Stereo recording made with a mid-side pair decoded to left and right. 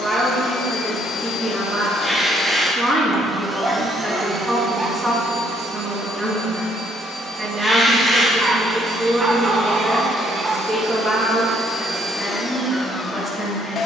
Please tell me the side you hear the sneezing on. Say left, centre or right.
centre.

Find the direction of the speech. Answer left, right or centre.
centre.